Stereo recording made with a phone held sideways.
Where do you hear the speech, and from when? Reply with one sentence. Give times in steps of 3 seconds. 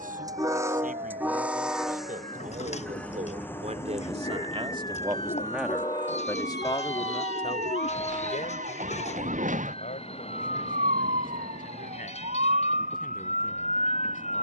In this clip you hear the speech on the right from 0 s and on the left from 6 s.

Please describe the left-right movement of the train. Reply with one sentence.
In this clip you hear the train go from the right side to the left.